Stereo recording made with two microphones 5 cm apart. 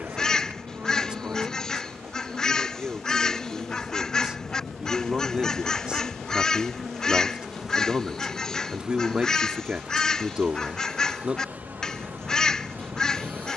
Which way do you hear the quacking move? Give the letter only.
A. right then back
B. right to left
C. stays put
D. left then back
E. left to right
C.